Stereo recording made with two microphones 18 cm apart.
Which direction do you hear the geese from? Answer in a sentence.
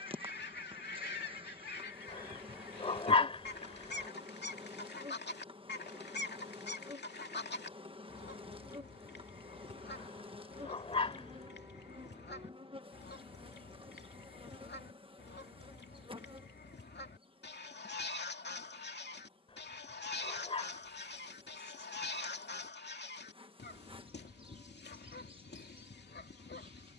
You can hear the geese on the left.